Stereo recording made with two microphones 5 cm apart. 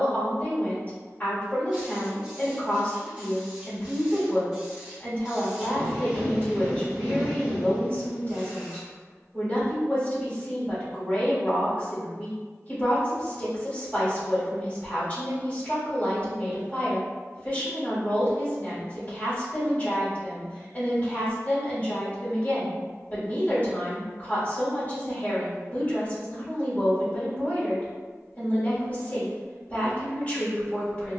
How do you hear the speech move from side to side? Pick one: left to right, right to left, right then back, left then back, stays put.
stays put.